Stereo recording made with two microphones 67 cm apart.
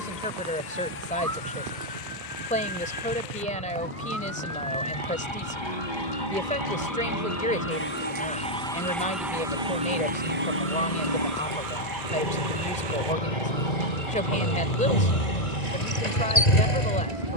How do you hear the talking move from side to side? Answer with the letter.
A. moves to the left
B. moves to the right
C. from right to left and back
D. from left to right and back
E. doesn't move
E.